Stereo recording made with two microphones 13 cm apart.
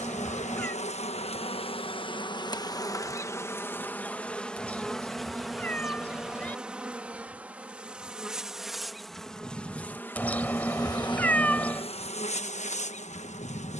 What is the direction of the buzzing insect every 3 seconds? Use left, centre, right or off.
left, centre, centre, left, left.